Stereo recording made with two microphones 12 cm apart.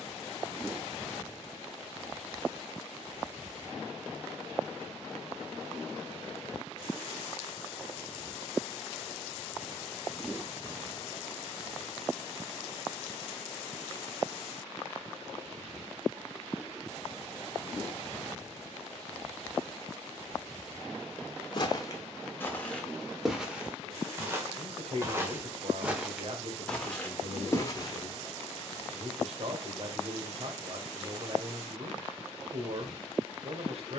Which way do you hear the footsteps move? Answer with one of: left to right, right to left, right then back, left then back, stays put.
right then back.